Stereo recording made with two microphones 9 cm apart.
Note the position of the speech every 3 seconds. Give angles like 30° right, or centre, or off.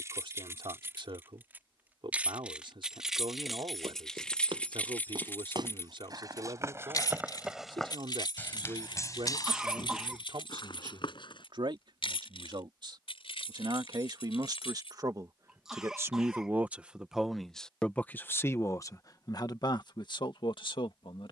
60° right, 60° right, 60° right, 60° right, 50° right, 20° right, 50° left.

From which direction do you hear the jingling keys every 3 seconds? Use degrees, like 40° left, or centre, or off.
20° right, 10° left, 50° left, 70° left, 80° left, off, off.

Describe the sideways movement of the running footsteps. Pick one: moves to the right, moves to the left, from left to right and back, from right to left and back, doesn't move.
moves to the left.